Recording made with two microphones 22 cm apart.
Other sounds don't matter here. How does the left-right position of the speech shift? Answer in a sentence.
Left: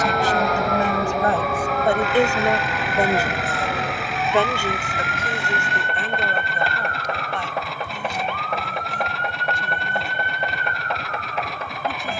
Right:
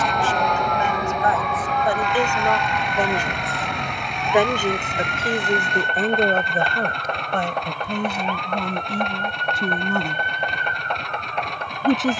In this clip you hear the speech move to the right.